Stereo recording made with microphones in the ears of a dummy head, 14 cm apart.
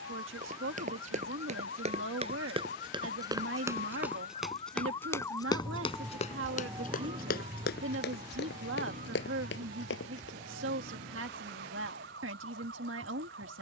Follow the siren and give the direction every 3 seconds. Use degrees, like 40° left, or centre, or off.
70° left, 30° left, 30° right, 50° right, 60° right.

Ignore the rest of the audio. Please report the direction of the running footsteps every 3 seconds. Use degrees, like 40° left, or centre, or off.
40° right, centre, 60° left, 80° left, off.